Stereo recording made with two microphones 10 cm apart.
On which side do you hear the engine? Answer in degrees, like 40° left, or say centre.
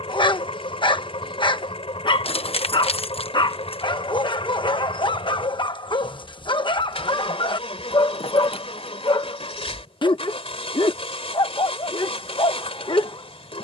70° left.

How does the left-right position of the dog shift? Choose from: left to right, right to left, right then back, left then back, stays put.
stays put.